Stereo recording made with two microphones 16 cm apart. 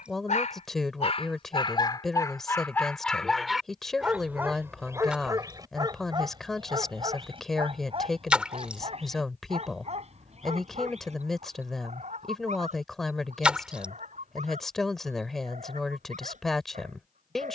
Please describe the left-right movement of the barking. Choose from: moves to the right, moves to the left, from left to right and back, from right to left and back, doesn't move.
moves to the right.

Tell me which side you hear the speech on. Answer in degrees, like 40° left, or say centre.
centre.